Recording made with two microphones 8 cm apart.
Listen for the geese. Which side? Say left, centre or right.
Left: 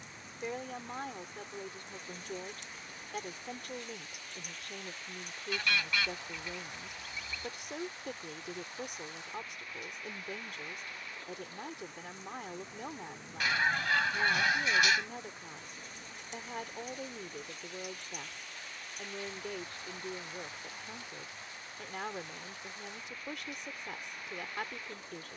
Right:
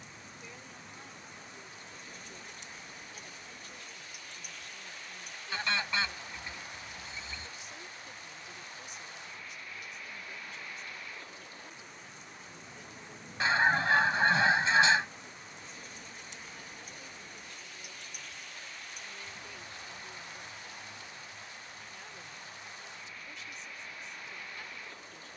right.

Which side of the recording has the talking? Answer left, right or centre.
left.